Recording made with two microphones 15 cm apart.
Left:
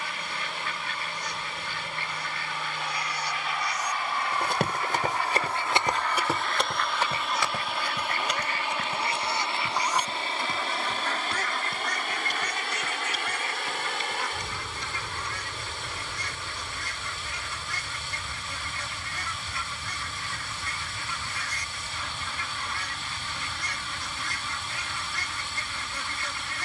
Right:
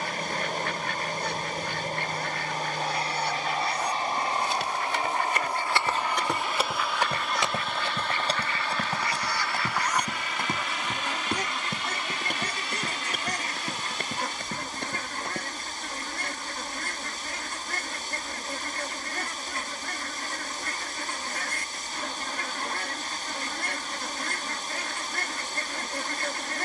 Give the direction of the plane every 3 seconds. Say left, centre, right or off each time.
right, right, centre, left, left, left, left, left, left.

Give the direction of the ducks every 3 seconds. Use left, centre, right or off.
right, right, centre, centre, right, right, right, right, right.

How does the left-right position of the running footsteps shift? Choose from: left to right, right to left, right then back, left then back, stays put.
left to right.